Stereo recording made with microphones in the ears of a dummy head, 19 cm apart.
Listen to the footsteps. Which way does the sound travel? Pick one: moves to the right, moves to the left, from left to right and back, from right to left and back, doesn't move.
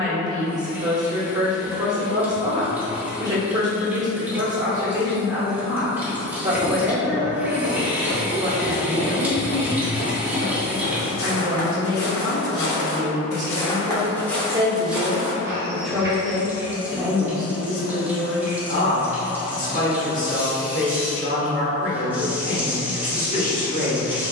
from right to left and back.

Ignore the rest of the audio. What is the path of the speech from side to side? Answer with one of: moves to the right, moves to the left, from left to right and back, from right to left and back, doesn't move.
moves to the left.